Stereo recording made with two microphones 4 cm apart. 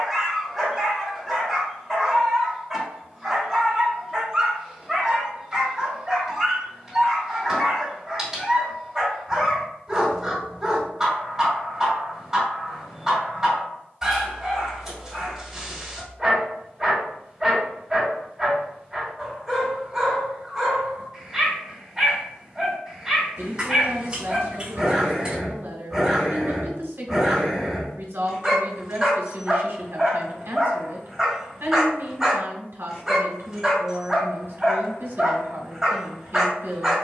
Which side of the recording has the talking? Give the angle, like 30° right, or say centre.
80° right.